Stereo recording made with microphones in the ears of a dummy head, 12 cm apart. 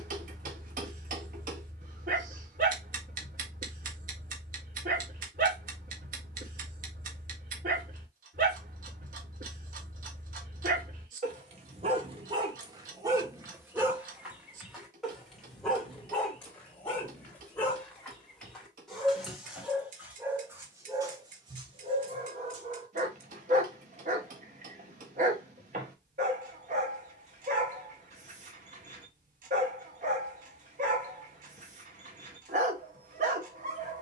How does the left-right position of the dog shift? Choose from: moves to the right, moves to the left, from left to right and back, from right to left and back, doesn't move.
from right to left and back.